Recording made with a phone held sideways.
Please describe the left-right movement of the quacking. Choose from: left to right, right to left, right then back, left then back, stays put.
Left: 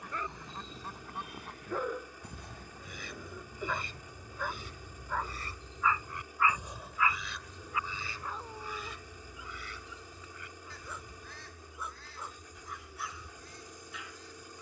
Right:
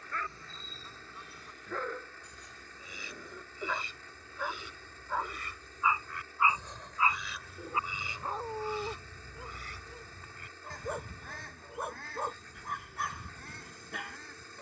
left to right.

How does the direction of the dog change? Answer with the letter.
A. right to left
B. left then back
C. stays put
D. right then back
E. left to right
E.